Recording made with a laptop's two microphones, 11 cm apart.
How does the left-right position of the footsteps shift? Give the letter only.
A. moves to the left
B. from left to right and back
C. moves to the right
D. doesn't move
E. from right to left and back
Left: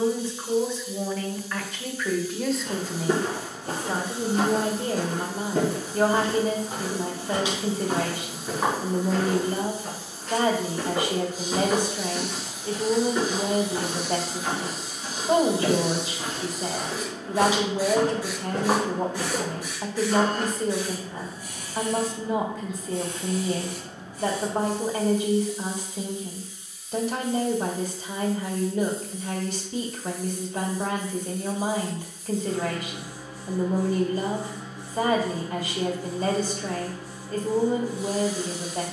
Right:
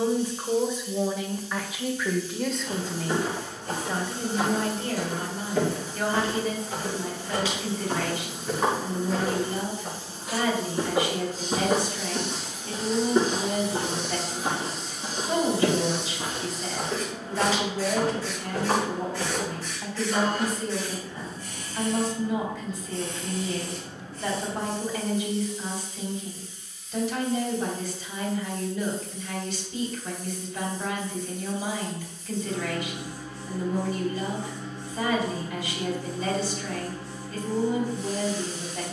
B.